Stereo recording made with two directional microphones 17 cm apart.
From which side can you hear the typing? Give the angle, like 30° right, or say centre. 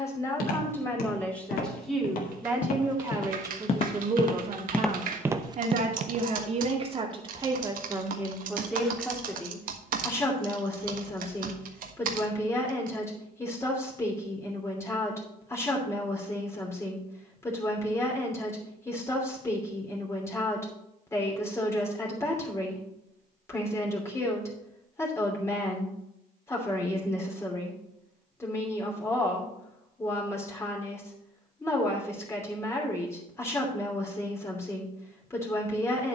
60° right.